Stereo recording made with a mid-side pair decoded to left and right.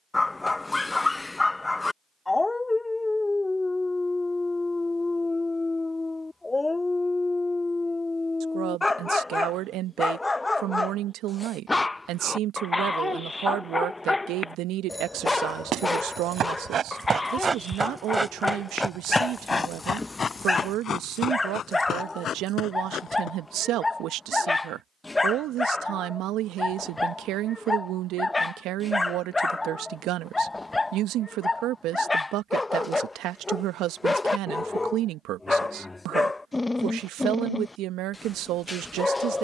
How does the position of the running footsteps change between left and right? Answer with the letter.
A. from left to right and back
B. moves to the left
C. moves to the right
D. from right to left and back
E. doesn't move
B.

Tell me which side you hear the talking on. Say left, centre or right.
right.